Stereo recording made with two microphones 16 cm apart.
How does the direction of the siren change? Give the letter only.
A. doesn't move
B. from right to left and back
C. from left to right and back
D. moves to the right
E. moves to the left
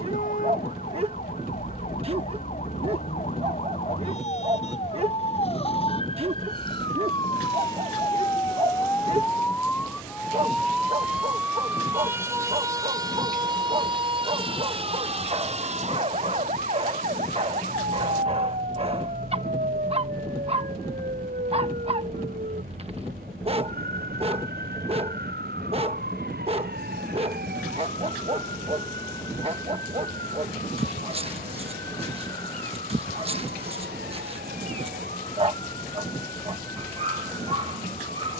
D.